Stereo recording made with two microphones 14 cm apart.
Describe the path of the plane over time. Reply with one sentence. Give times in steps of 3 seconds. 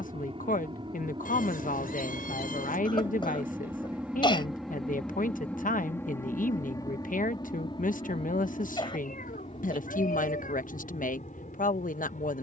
In this clip you hear the plane on the right from 0 s, in the centre from 3 s and on the left from 6 s.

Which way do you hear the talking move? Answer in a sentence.
In this clip you hear the talking stay put.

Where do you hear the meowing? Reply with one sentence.
You can hear the meowing on the left.